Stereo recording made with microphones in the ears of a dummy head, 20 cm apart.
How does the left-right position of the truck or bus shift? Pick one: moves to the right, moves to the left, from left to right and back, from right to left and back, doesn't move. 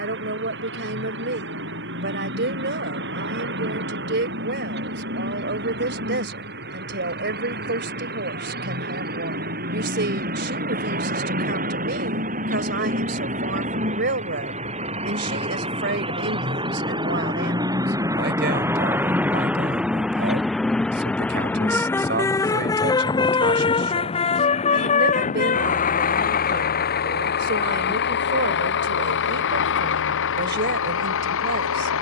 moves to the left.